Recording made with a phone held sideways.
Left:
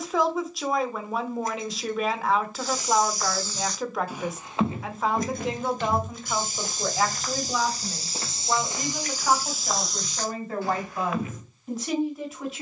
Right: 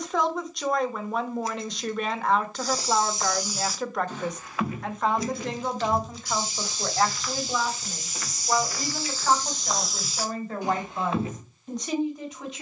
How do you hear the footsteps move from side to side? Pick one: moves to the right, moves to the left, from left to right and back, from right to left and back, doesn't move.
from right to left and back.